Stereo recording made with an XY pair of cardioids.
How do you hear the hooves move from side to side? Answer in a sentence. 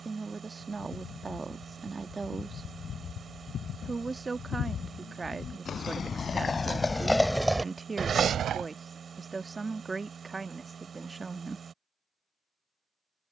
You can hear the hooves travel towards the right.